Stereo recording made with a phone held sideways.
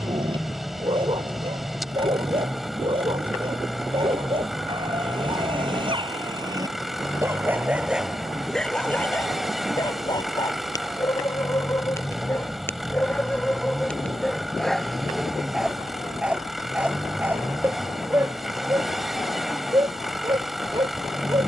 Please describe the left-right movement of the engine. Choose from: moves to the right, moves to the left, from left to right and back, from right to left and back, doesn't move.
doesn't move.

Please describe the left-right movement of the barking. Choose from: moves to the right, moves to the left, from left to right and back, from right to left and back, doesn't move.
from right to left and back.